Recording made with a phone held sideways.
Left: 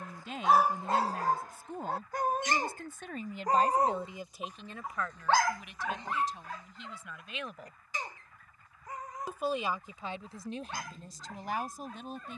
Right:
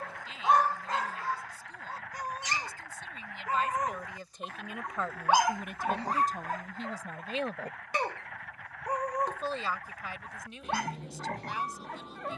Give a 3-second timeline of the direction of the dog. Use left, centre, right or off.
left, centre, right, right.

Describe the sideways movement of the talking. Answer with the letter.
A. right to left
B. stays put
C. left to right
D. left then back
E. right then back
E.